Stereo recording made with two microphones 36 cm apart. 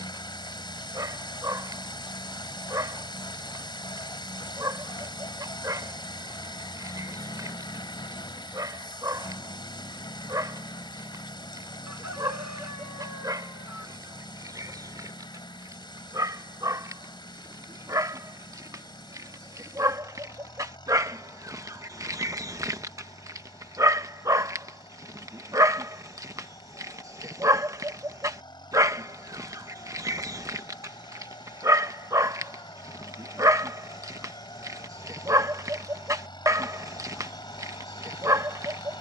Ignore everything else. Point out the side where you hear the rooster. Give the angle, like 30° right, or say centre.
50° right.